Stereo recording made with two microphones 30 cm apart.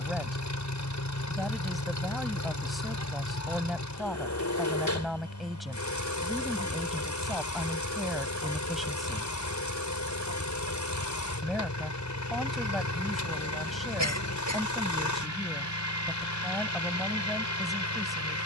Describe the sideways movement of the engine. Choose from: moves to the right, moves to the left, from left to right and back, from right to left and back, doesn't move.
doesn't move.